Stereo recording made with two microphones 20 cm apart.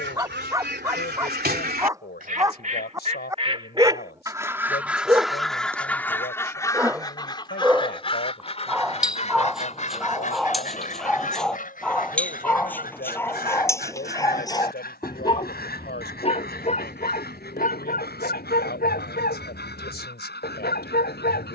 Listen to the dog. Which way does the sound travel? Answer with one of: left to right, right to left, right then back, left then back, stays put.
right to left.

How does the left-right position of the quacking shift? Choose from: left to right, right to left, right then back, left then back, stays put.
right to left.